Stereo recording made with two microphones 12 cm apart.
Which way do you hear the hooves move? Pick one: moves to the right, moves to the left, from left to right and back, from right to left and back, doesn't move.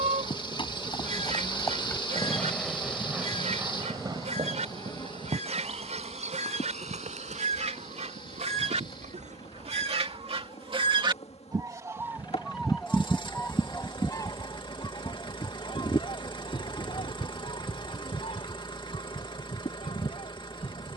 moves to the right.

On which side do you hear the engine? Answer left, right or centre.
left.